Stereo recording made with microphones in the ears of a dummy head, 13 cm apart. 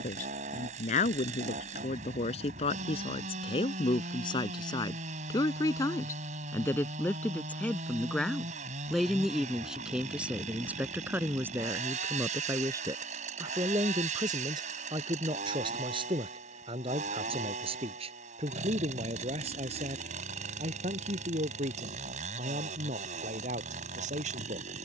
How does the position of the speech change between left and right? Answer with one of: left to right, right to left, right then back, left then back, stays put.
left to right.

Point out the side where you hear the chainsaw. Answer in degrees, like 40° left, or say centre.
50° right.